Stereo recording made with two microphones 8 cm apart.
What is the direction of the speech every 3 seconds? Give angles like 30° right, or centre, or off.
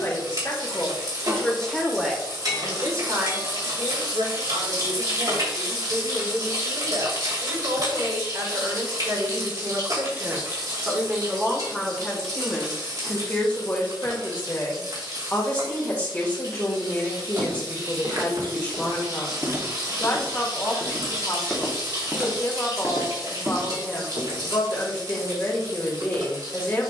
10° left, 60° right, 60° right, 20° right, 20° left, 20° left, 20° left, 20° left, 20° left.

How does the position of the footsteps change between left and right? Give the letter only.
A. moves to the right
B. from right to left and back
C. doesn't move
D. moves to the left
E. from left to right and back
B.